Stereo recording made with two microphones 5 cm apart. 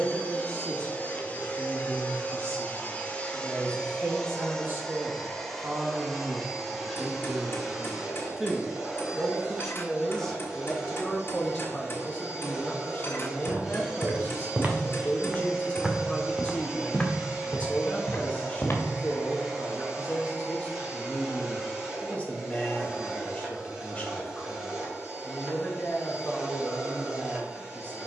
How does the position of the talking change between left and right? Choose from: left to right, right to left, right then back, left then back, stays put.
right to left.